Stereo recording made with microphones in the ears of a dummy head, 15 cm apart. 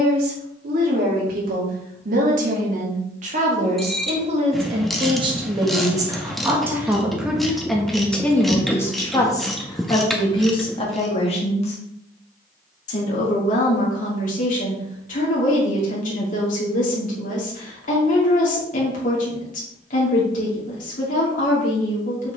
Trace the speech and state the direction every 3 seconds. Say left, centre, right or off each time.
right, right, centre, left, left, left, left, left.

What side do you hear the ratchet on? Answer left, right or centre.
centre.